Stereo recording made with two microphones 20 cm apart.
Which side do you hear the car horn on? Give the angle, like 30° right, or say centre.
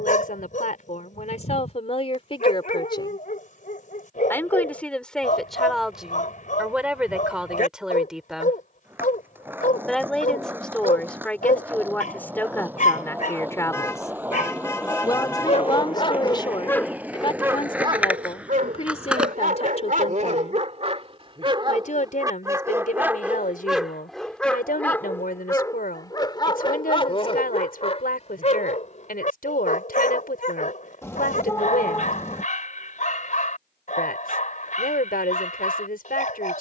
10° left.